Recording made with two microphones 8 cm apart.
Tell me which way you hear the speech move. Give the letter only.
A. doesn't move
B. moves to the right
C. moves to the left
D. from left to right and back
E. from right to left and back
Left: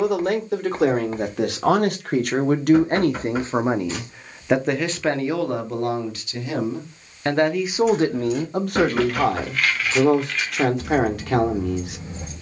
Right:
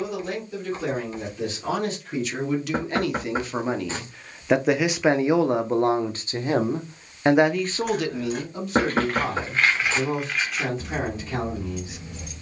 D.